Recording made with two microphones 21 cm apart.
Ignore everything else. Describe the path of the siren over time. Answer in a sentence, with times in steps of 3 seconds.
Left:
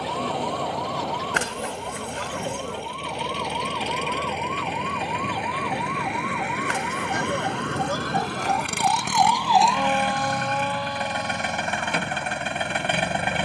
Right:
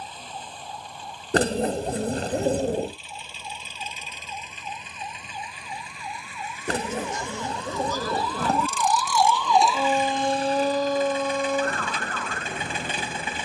In this clip you hear the siren on the left from 0 s and on the right from 9 s.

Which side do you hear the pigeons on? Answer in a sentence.
You can hear the pigeons on the right.